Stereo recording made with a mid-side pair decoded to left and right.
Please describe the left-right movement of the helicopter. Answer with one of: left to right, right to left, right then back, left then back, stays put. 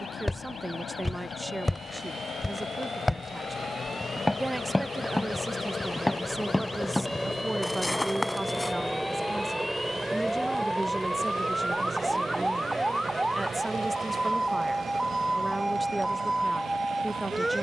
left to right.